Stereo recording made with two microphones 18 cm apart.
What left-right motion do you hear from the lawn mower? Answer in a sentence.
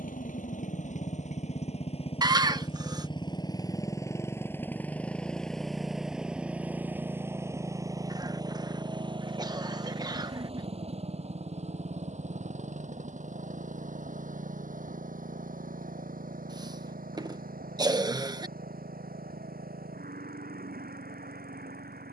You can hear the lawn mower go from the left side to the right.